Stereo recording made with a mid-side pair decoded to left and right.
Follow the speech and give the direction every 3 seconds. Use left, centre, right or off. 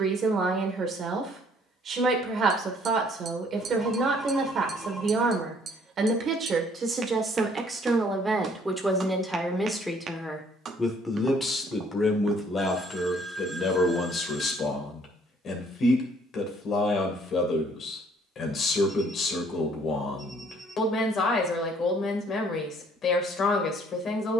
right, right, right, centre, left, left, left, left.